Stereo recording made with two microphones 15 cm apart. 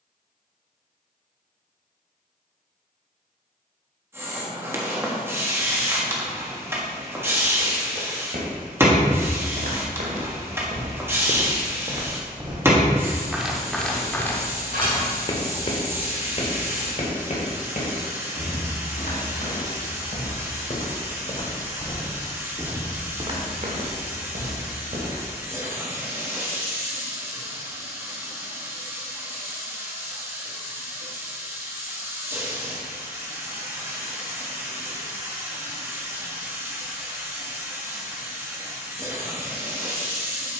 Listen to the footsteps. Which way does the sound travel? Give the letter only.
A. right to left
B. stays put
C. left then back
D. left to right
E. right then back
C.